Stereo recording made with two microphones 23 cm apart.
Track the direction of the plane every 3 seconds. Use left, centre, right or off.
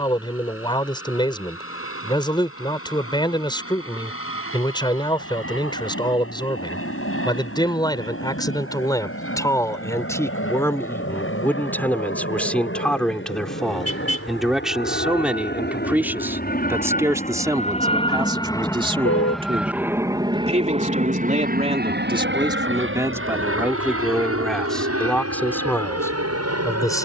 left, left, left, left, left, left, centre, right, right.